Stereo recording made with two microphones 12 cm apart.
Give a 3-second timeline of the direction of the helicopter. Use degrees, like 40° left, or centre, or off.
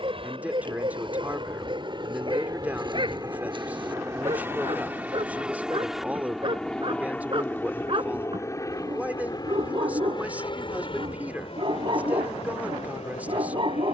40° right, 20° right, 10° left, 40° left, 50° left.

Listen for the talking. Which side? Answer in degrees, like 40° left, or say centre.
10° right.